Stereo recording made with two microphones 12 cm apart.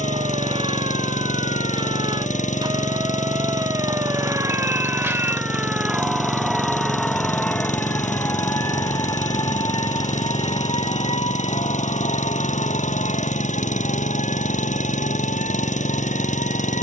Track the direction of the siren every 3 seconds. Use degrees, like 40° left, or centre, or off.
40° right, 20° right, 10° left, 40° left, 60° left, 70° left.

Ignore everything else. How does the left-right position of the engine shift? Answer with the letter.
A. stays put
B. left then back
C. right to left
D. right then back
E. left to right
A.